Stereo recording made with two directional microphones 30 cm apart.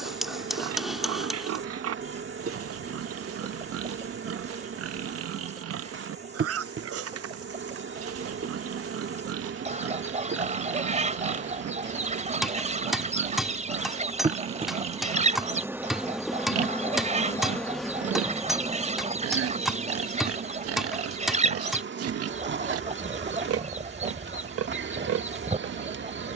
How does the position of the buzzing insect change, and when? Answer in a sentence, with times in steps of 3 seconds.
You can hear the buzzing insect on the right from 0 s, in the centre from 15 s and on the right from 18 s.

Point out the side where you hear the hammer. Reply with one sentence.
You can hear the hammer in the centre.